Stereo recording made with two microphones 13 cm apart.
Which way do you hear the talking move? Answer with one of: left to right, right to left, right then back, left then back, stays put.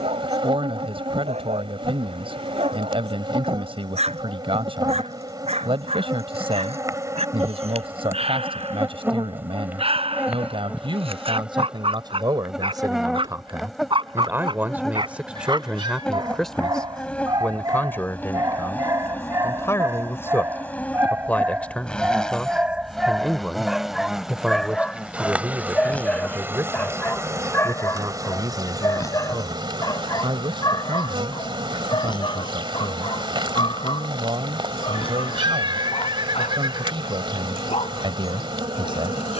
left then back.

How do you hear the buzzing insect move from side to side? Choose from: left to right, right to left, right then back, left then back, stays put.
left then back.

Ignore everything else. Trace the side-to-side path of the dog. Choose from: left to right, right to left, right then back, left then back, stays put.
right to left.